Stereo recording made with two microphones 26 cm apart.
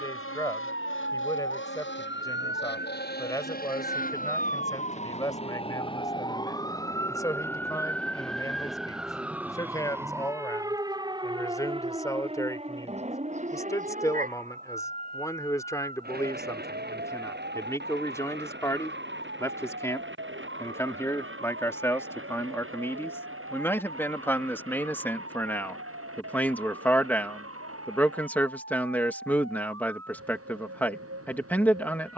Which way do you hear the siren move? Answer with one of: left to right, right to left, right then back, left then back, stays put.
left to right.